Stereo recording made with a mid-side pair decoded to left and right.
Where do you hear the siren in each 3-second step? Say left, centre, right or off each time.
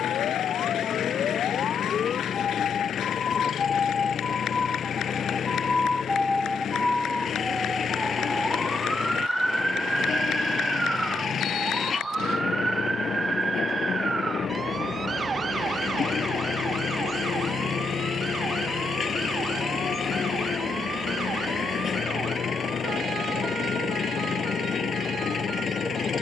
left, left, centre, centre, right, right, right, right, right.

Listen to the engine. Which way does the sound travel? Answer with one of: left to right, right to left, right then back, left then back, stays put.
stays put.